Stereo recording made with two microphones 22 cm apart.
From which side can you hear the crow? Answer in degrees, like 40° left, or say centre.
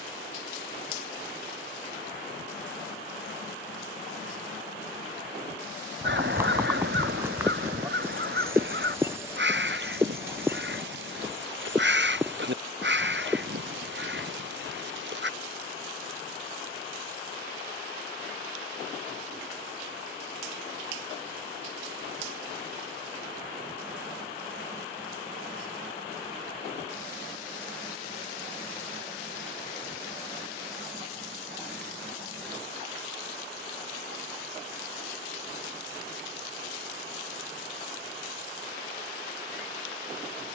50° right.